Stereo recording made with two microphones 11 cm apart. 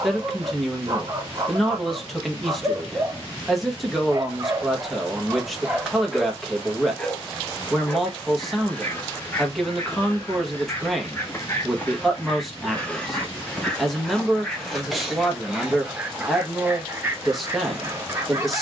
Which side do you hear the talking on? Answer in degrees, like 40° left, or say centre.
centre.